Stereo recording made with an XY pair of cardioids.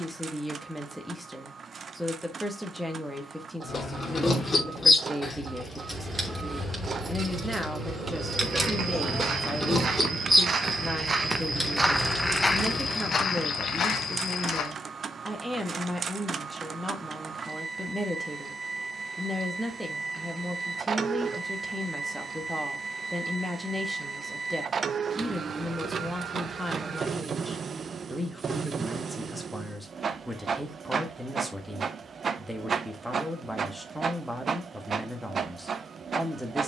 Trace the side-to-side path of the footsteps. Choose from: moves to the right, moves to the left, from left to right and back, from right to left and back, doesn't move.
moves to the left.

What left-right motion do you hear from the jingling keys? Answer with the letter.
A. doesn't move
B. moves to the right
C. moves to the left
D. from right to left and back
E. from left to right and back
E.